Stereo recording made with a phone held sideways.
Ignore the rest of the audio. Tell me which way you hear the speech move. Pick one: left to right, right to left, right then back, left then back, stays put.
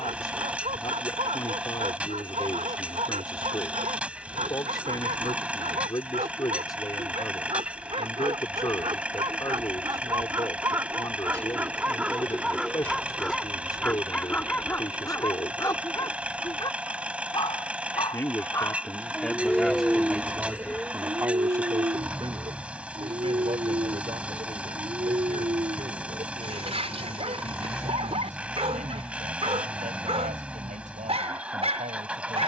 left to right.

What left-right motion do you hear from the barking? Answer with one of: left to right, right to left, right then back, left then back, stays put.
left then back.